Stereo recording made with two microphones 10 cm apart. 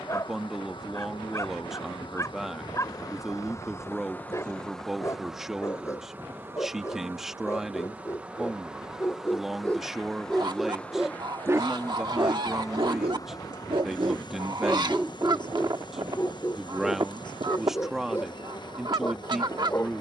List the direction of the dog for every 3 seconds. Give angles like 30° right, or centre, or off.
30° left, 30° left, 30° left, centre, 50° right, 20° left, 30° left.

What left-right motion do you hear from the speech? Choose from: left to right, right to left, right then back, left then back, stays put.
stays put.